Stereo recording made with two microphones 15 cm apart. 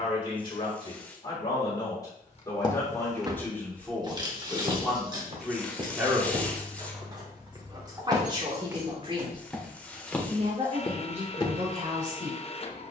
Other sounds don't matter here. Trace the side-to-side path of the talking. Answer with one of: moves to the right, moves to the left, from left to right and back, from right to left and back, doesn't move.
moves to the right.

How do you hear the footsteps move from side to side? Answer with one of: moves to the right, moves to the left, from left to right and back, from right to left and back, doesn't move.
from left to right and back.